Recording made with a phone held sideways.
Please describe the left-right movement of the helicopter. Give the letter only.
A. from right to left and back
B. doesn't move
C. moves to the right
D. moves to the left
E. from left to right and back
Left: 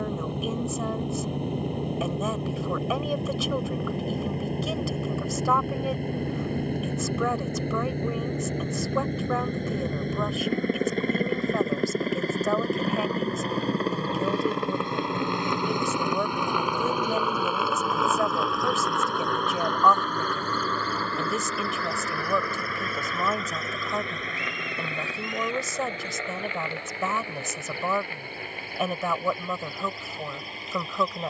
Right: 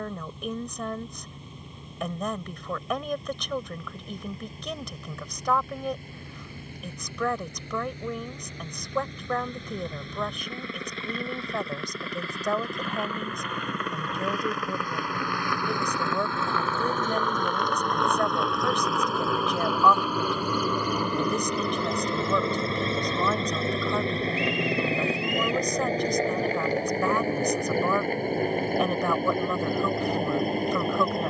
C.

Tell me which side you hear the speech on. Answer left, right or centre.
centre.